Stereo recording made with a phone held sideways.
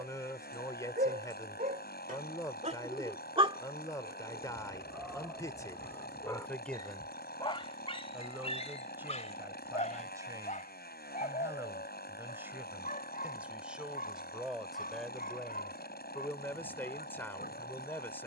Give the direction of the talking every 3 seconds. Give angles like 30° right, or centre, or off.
20° left, 20° left, centre, 20° right, 10° right, 10° left.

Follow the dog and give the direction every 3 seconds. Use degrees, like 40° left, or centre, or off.
50° right, 10° right, 30° left, 50° left, 60° left, 60° left.